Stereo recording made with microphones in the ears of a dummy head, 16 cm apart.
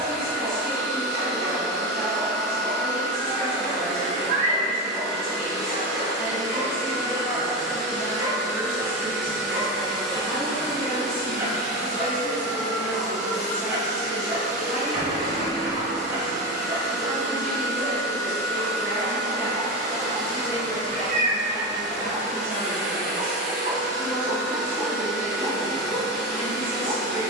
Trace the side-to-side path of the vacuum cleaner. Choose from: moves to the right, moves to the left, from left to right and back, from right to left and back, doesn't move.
doesn't move.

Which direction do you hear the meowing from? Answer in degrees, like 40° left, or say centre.
40° right.